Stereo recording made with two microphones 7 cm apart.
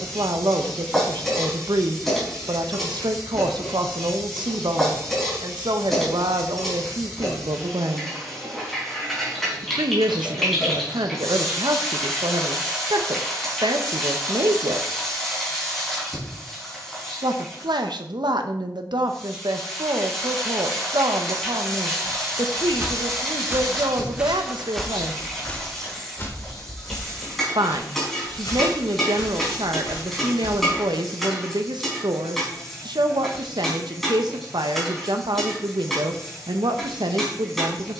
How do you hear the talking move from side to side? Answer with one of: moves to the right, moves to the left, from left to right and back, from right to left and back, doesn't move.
doesn't move.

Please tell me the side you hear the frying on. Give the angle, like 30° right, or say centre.
centre.